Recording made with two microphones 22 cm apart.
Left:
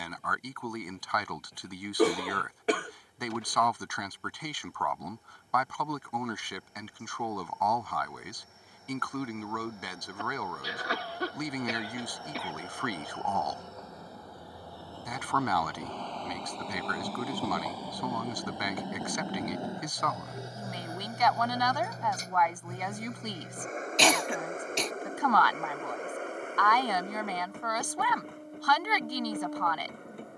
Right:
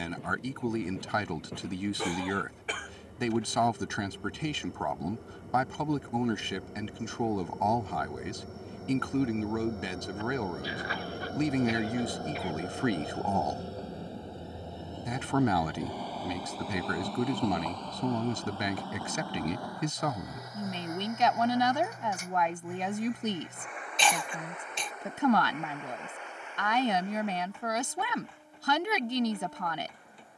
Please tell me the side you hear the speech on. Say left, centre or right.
right.